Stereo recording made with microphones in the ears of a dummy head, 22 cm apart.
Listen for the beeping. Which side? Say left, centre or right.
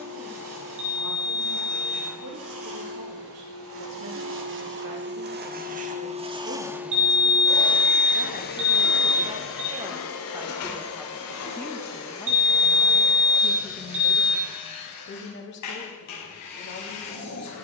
right.